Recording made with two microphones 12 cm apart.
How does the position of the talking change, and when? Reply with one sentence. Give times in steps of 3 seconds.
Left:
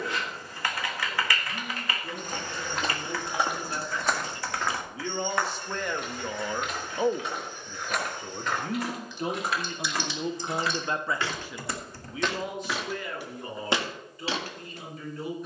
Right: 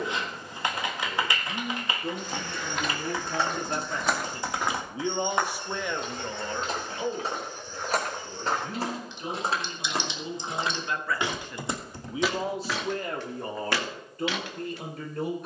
In this clip you hear the talking on the right from 0 s, on the left from 6 s and on the right from 12 s.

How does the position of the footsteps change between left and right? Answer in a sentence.
You can hear the footsteps go right and come back.